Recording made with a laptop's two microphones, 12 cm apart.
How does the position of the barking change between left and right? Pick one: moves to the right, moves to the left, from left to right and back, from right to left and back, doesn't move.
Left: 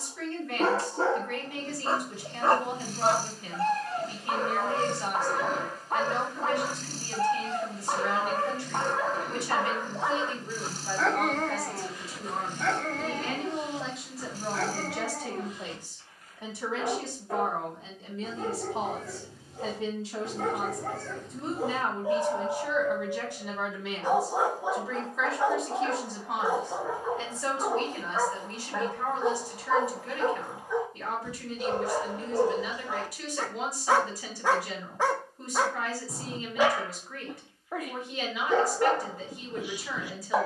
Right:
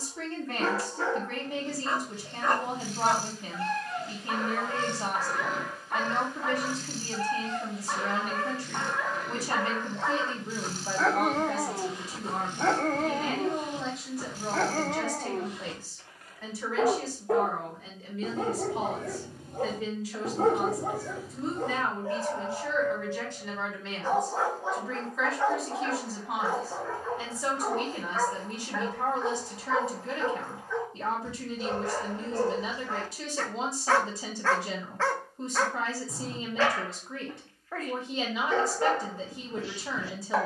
from left to right and back.